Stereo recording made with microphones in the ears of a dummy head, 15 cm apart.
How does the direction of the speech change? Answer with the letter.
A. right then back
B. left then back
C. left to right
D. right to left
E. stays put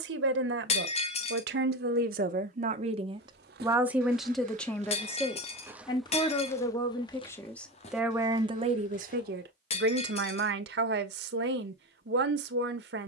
B.